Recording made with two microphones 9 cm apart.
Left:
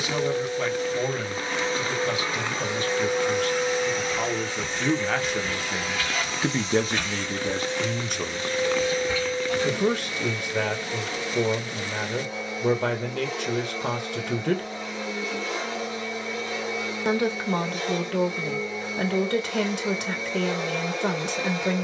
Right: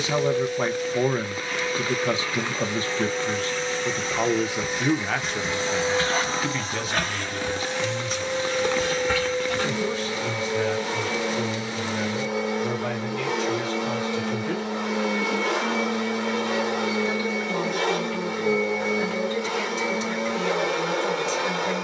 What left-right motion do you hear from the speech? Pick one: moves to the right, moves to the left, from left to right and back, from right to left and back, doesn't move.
moves to the left.